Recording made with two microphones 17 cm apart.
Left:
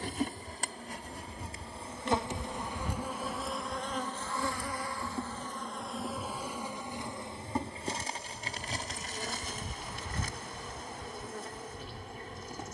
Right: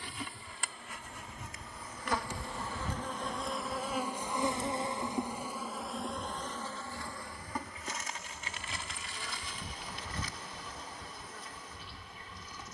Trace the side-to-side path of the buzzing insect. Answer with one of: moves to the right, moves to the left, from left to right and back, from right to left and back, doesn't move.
from left to right and back.